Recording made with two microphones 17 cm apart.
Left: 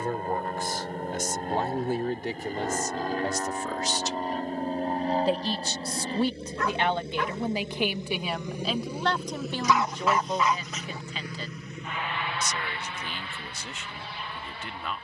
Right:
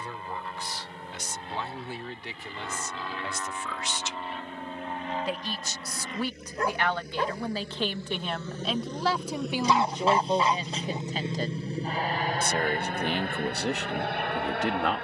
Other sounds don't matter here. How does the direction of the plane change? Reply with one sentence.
You can hear the plane move from left to right.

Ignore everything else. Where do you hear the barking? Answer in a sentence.
In this clip you hear the barking on the right.